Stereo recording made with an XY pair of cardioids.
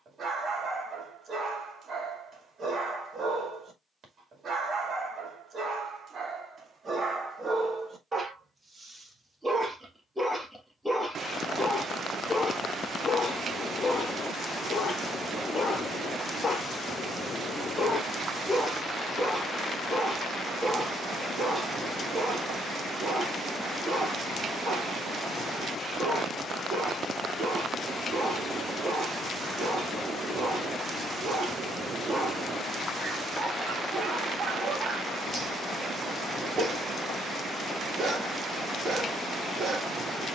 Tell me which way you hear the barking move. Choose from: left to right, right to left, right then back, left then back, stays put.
left then back.